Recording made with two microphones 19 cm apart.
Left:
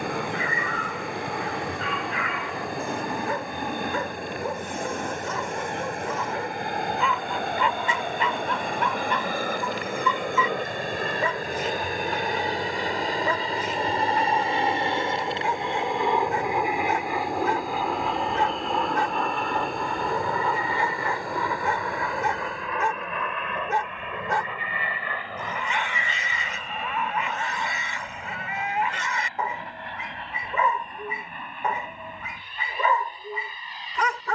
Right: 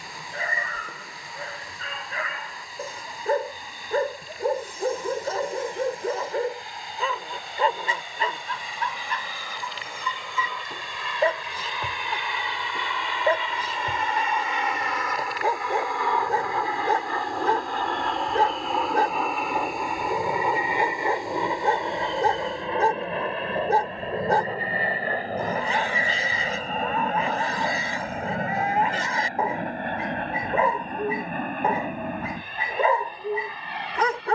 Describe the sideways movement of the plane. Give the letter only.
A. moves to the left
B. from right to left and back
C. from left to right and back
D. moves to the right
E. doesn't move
D.